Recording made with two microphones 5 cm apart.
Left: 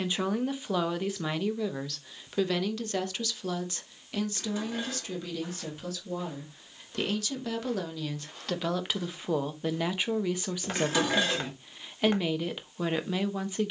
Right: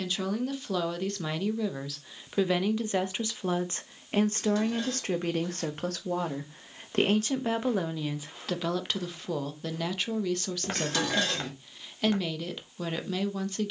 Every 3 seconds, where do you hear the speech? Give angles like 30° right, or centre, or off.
centre, 40° right, 30° right, 20° left, 20° left.